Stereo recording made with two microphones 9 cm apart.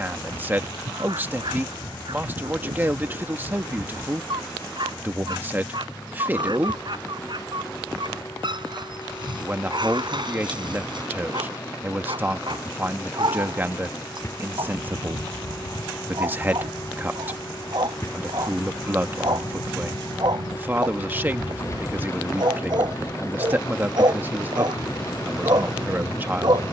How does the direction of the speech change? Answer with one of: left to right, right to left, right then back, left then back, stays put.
stays put.